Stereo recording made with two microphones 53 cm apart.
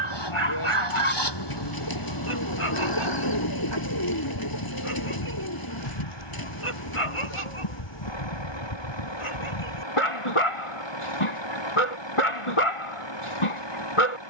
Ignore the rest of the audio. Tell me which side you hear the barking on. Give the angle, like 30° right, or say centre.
70° left.